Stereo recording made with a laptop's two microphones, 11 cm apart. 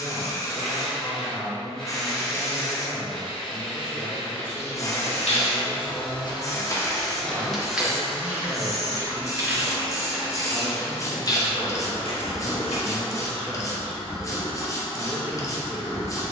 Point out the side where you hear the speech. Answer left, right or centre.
centre.